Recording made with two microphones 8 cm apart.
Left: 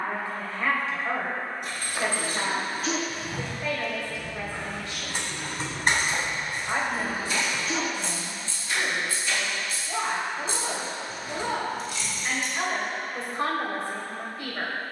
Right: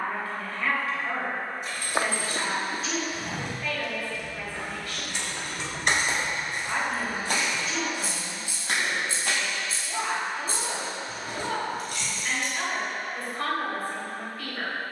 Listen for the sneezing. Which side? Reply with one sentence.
In this clip you hear the sneezing on the left.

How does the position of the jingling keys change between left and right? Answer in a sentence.
You can hear the jingling keys go from the left side to the right.